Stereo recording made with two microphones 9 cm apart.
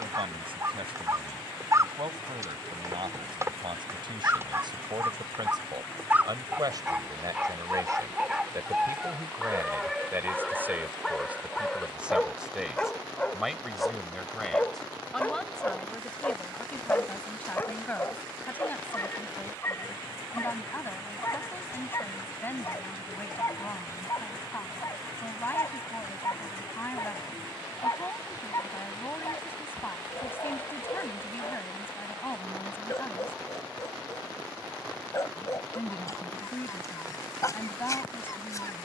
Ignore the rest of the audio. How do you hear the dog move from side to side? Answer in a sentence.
In this clip you hear the dog go from the right side to the left.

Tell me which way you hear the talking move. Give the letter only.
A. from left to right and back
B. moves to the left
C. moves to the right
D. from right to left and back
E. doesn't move
B.